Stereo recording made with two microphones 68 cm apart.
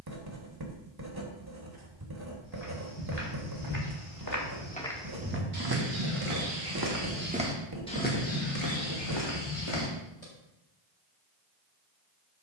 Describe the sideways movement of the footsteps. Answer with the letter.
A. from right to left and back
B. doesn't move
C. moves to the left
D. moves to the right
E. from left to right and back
E.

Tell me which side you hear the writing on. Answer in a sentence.
You can hear the writing on the right.